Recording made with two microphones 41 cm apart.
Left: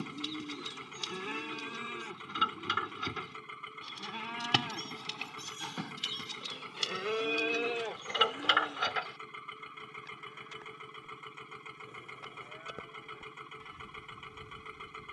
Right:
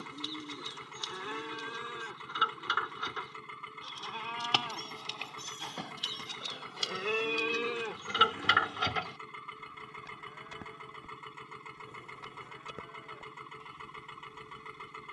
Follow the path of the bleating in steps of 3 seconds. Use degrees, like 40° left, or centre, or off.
40° left, 30° left, 10° right, 60° right, 20° left.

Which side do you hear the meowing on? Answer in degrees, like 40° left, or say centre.
centre.